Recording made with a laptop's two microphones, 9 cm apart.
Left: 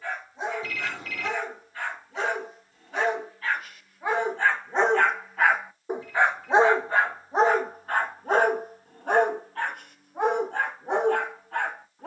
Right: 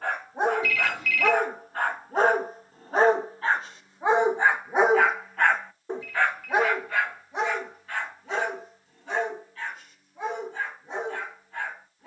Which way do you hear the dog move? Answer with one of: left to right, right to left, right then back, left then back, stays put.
right to left.